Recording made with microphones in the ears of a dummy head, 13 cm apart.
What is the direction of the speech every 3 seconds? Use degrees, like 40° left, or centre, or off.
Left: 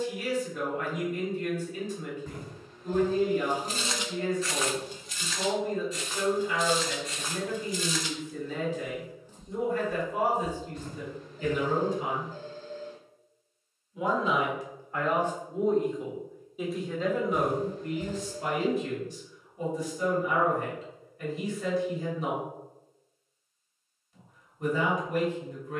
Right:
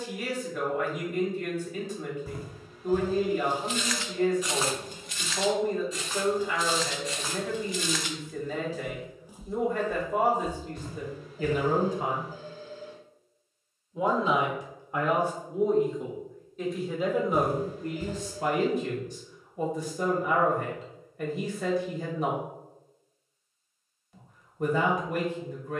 50° right, 50° right, 50° right, 50° right, 30° right, 10° right, 50° right, 50° right, 50° right.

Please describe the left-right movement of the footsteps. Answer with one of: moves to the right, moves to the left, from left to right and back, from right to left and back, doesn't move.
from left to right and back.